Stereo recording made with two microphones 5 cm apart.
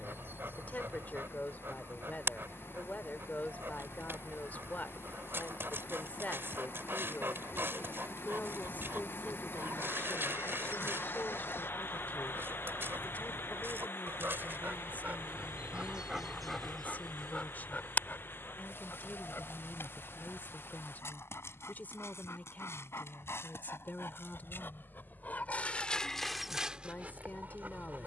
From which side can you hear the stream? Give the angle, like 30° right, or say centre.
50° left.